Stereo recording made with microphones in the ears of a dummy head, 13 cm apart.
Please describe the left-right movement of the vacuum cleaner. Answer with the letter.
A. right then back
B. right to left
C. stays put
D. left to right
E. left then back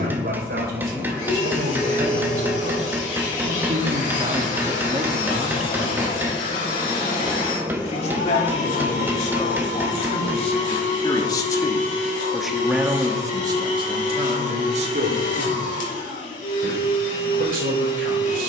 C.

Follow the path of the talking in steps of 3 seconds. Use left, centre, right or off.
right, right, left, left, right, right.